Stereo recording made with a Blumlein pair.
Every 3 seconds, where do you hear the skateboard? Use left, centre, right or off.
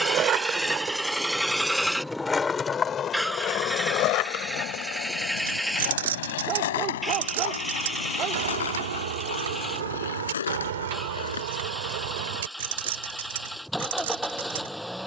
centre, left, left, left, off.